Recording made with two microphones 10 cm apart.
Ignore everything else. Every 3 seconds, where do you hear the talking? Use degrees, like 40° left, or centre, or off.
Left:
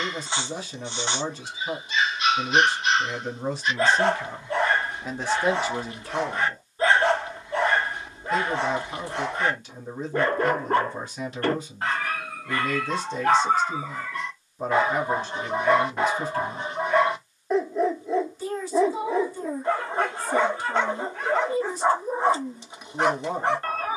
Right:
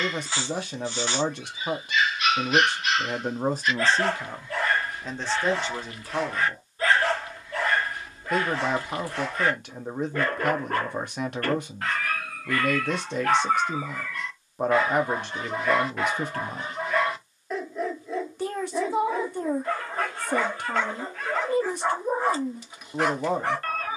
60° right, 20° right, 40° right, 60° right, 60° right, 60° right, 60° right, 60° right.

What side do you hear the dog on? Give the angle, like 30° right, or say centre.
20° left.